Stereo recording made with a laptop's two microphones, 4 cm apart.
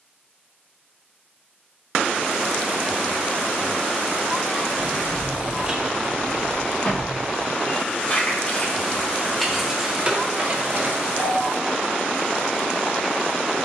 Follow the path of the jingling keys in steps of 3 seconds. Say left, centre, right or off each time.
off, right, left, right, off.